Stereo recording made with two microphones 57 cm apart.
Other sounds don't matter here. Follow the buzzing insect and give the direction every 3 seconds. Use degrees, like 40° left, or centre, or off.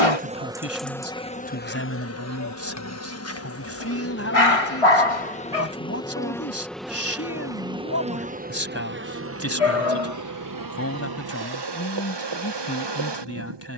10° left, 20° left, 10° right, 30° right, 50° right.